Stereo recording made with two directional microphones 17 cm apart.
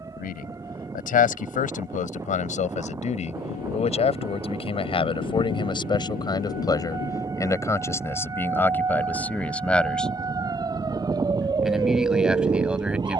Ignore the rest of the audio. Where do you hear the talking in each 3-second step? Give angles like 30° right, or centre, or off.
50° left, 30° left, 20° left, centre, 10° right.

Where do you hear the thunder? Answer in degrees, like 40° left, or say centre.
60° left.